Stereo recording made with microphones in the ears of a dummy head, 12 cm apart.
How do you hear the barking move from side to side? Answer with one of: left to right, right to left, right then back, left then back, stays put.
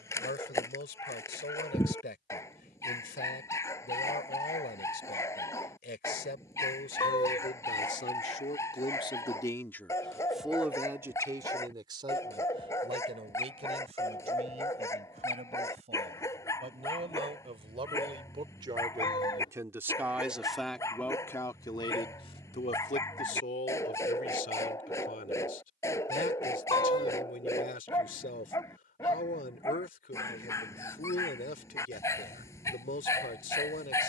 stays put.